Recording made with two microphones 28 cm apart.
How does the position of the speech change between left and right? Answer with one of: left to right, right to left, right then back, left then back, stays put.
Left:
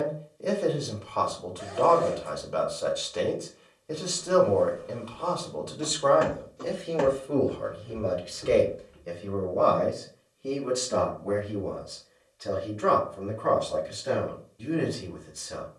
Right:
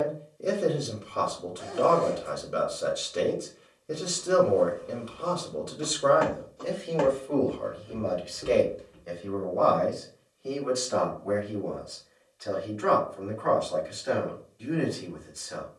right to left.